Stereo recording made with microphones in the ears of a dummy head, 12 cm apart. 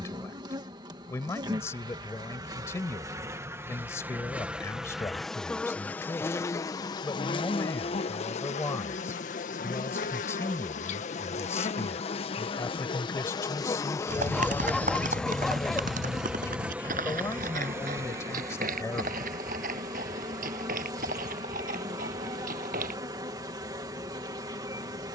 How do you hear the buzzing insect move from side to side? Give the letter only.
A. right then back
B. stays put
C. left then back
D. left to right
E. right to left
C.